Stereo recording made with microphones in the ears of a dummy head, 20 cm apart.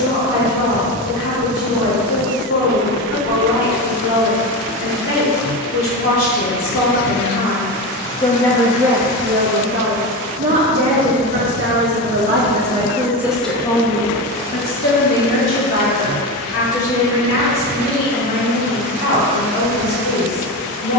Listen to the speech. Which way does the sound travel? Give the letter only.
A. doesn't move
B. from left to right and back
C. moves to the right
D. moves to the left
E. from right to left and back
B.